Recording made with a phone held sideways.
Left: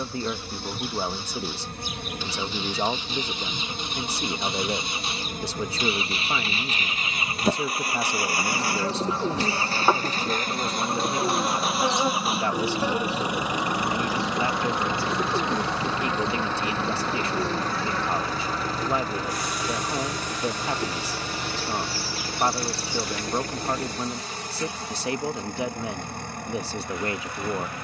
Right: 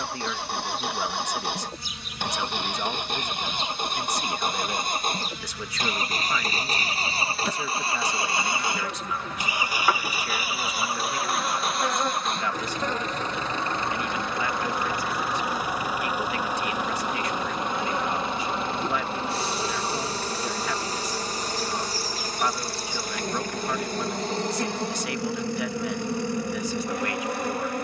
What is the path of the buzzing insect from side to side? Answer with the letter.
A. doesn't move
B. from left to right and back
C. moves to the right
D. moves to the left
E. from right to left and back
C.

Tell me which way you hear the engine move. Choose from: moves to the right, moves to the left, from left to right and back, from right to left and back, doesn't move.
moves to the left.